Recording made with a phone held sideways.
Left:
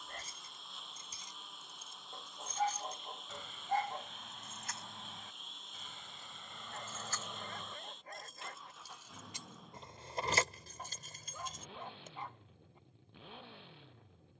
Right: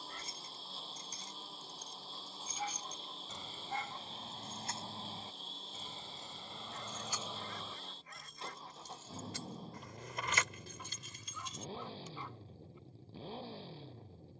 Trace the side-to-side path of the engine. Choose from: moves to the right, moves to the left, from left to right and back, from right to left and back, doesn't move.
doesn't move.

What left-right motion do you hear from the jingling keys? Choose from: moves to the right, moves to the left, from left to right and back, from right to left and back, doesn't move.
from left to right and back.